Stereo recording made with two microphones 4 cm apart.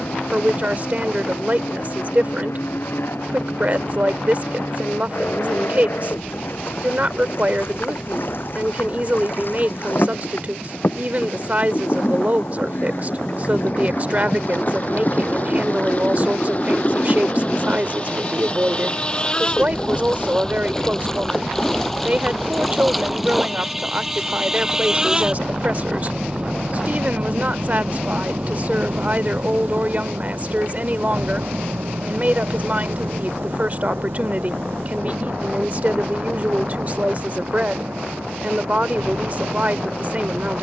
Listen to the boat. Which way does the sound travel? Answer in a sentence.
In this clip you hear the boat move from left to right.